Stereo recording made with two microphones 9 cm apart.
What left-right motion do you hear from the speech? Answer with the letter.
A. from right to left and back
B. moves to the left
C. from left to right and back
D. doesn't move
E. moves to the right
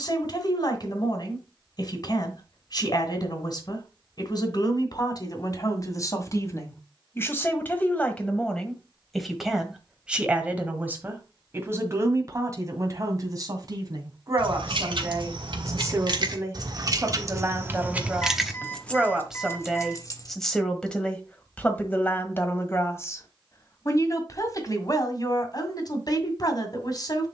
C.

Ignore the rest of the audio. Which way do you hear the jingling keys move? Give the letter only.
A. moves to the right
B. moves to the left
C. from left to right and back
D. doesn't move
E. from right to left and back
B.